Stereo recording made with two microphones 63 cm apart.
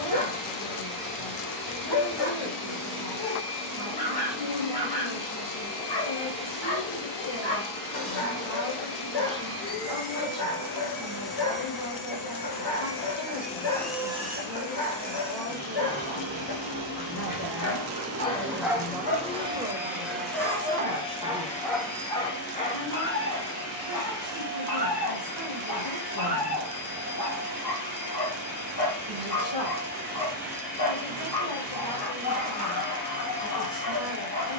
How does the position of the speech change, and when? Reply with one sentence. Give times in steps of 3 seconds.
You can hear the speech on the left from 0 s, in the centre from 18 s and on the left from 21 s.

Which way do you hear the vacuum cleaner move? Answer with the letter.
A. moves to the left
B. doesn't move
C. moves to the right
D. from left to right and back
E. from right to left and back
D.